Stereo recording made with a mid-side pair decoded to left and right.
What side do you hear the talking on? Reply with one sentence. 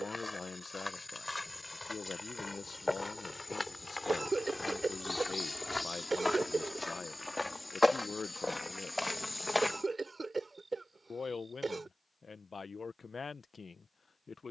You can hear the talking on the left.